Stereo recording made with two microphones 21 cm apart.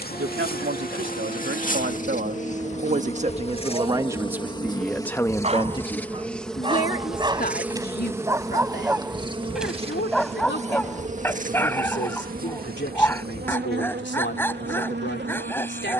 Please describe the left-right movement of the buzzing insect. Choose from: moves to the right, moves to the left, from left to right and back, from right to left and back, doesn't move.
moves to the right.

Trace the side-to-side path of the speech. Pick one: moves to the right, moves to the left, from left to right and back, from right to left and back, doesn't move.
moves to the left.